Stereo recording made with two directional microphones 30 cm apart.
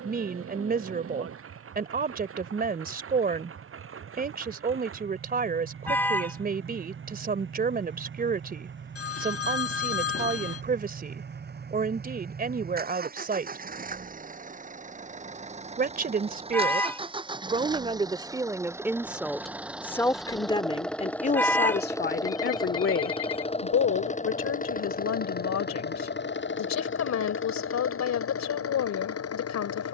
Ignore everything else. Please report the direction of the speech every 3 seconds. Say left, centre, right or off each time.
right, right, right, right, right, right, centre, left, left, left.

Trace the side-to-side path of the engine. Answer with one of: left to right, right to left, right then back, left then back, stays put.
right to left.